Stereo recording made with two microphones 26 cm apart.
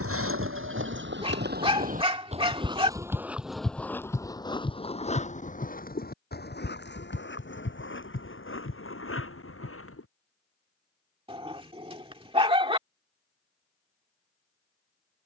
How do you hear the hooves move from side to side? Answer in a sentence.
In this clip you hear the hooves move from right to left.